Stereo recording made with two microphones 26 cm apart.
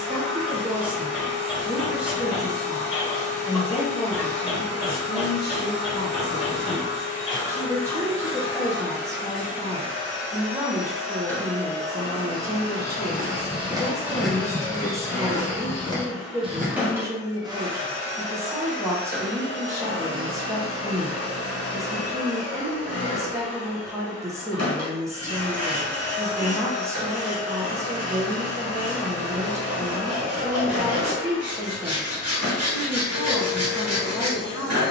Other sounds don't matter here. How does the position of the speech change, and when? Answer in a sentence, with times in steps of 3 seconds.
In this clip you hear the speech in the centre from 0 s, on the left from 3 s and in the centre from 6 s.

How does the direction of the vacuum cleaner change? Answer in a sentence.
You can hear the vacuum cleaner go left and come back.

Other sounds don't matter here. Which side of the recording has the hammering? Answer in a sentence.
You can hear the hammering in the centre.